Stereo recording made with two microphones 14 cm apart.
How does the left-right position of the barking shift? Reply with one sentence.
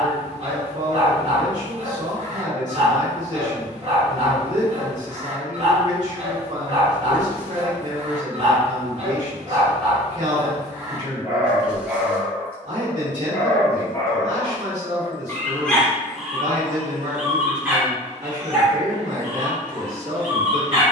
You can hear the barking go left and come back.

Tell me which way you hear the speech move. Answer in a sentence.
You can hear the speech stay put.